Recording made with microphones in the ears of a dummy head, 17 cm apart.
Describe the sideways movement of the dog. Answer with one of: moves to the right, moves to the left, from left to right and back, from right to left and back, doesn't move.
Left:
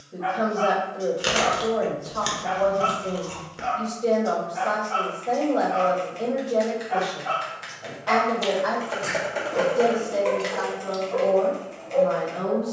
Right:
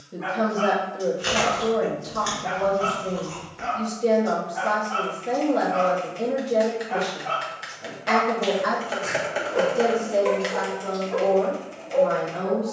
from right to left and back.